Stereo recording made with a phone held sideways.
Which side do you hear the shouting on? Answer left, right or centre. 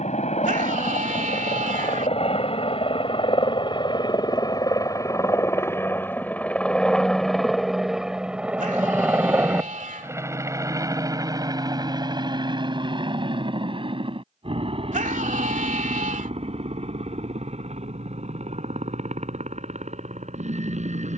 right.